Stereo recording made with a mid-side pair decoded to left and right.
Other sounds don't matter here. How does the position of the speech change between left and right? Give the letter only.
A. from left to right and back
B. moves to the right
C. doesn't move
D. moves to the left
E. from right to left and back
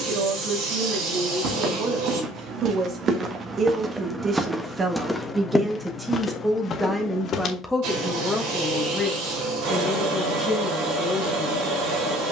D.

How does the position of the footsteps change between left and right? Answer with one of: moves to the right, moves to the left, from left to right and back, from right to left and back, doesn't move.
moves to the left.